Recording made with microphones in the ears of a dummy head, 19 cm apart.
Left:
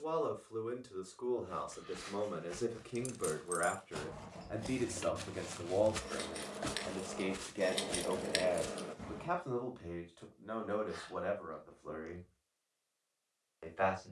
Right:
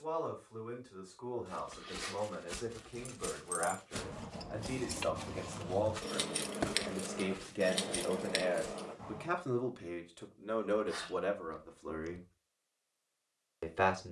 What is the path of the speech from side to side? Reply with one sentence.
You can hear the speech travel towards the right.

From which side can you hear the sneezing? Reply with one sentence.
You can hear the sneezing on the right.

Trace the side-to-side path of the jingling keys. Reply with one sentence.
You can hear the jingling keys move from left to right and back again.